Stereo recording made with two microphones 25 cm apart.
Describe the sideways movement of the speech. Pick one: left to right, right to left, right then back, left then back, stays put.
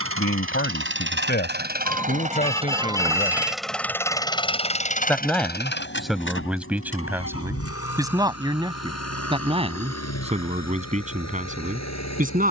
left to right.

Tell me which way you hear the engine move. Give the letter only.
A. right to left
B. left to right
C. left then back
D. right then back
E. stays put
A.